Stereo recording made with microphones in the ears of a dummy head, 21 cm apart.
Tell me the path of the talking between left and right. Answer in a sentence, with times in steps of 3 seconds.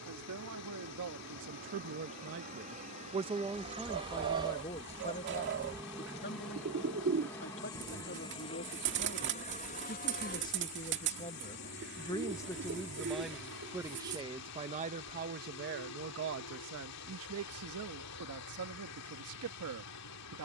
You can hear the talking on the right from 0 s, in the centre from 3 s, on the left from 6 s, in the centre from 12 s and on the right from 15 s.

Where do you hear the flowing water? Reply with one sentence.
In this clip you hear the flowing water on the left.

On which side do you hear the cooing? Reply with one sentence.
You can hear the cooing on the right.